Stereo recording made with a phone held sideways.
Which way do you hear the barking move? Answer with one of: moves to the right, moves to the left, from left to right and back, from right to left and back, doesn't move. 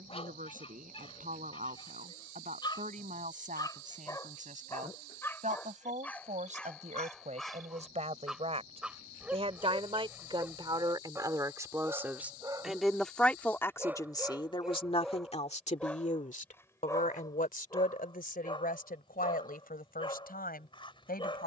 from left to right and back.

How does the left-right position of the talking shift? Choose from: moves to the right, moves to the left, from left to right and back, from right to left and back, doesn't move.
moves to the left.